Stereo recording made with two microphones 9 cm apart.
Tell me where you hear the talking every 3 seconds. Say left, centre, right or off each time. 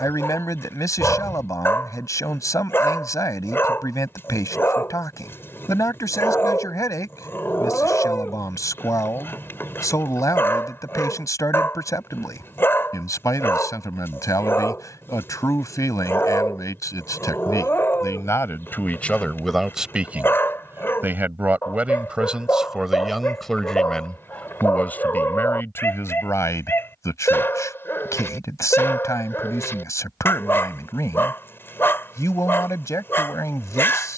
left, left, left, left, left, left, centre, centre, left, left, left, left.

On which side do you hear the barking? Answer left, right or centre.
left.